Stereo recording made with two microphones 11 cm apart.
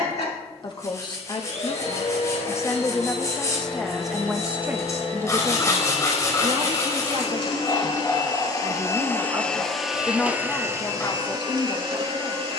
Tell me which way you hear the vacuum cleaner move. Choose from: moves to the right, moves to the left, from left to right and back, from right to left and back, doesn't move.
moves to the right.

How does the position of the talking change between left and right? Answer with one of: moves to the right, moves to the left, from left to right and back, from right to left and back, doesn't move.
from left to right and back.